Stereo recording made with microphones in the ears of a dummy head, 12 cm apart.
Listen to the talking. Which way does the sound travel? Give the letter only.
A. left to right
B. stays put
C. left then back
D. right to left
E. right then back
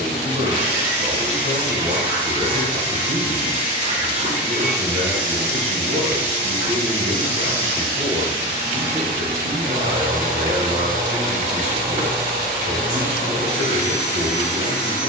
B.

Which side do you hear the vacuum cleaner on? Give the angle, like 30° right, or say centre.
60° right.